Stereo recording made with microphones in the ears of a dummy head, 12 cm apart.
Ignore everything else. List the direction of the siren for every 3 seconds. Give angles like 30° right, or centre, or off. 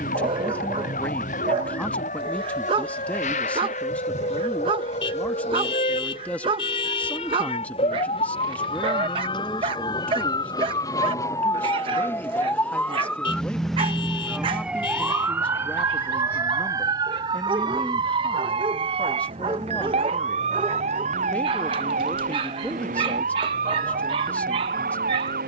60° left, 50° left, 40° left, 30° left, centre, 20° right, 40° right, 60° right, 60° right.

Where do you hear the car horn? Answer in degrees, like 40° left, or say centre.
40° left.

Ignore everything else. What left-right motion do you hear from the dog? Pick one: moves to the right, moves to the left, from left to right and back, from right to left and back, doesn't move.
doesn't move.